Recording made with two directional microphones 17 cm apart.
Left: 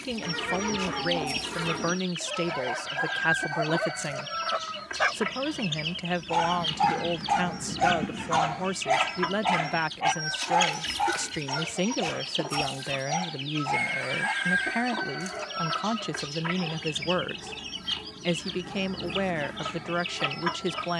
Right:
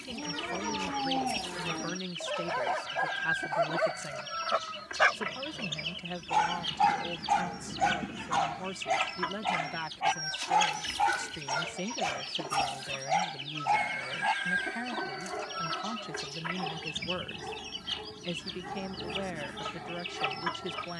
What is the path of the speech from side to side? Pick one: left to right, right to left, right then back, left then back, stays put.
stays put.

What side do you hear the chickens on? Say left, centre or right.
left.